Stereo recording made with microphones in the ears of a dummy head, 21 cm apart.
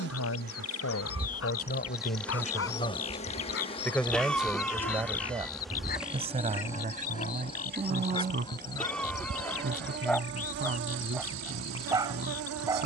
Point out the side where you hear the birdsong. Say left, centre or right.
left.